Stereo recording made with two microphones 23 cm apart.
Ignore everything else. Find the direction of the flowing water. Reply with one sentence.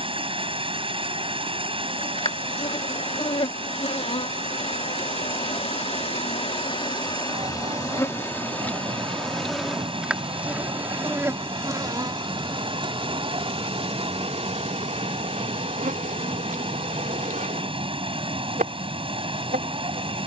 You can hear the flowing water on the right.